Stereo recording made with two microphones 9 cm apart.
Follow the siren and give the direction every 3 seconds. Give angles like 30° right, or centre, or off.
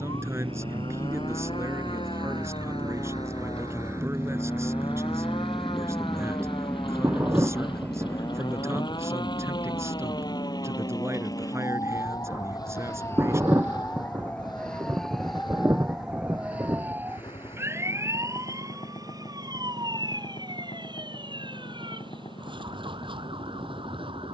70° left, 70° left, 60° left, 50° left, 20° left, 10° right, 40° right, 60° right.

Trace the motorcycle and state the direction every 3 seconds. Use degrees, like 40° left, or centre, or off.
60° right, 20° right, 20° left, 40° left, 50° left, 50° left, 50° left, 60° left.